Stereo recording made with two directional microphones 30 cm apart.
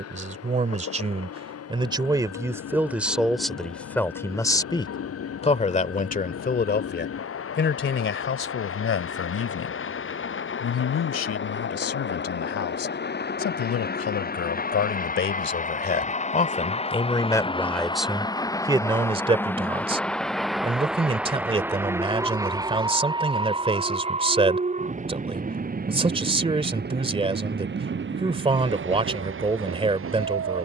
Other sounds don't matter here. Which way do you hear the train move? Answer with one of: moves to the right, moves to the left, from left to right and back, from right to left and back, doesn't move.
moves to the right.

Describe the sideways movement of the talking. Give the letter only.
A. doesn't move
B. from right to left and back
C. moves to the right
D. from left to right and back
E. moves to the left
B.